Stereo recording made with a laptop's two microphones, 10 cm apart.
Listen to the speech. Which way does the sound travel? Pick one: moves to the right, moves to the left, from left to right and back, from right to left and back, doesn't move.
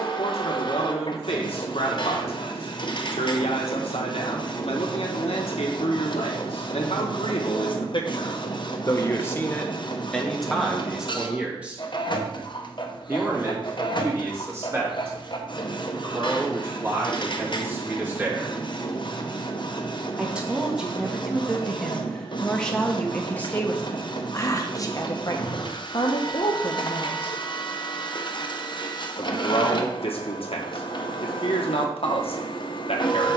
from left to right and back.